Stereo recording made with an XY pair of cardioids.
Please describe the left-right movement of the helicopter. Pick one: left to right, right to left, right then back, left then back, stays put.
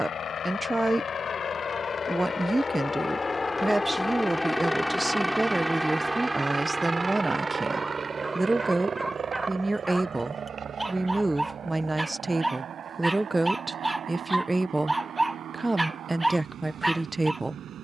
left to right.